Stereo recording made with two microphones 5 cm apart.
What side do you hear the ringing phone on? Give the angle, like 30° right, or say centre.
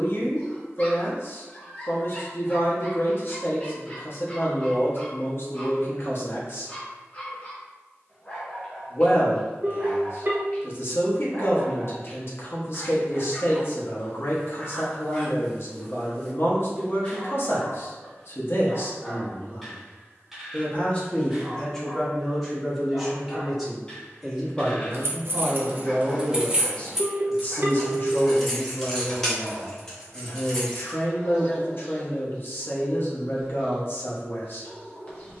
60° right.